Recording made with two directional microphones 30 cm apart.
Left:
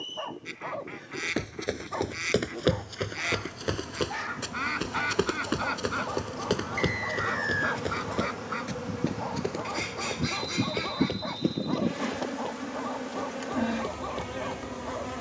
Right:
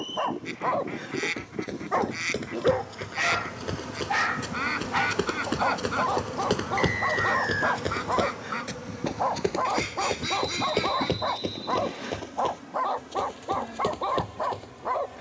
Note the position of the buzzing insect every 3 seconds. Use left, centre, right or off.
right, right, centre, left, left.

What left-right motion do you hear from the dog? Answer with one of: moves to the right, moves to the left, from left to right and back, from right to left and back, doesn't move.
doesn't move.